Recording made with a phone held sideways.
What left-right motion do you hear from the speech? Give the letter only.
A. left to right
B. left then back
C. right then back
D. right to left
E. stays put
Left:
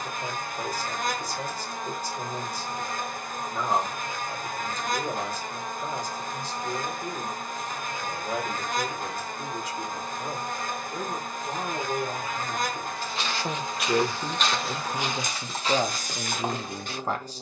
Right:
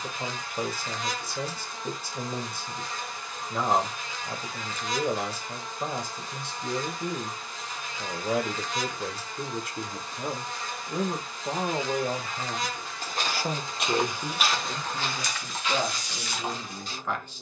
D.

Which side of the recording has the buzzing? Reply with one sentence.
In this clip you hear the buzzing on the left.